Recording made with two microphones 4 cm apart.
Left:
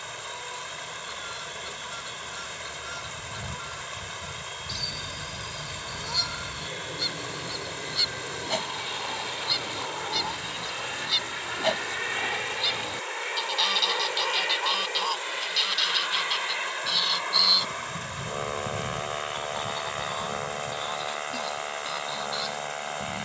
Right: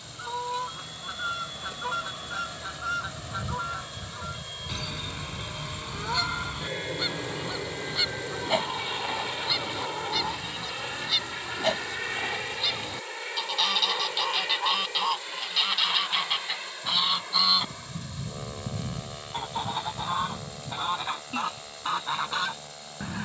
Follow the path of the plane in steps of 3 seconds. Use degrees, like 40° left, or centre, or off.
50° right, 40° right, 20° right, centre, 20° left, 30° left, 40° left, 50° left.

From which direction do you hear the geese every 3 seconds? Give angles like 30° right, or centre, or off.
40° right, 40° right, 20° right, 10° right, centre, 20° right, 30° right, 40° right.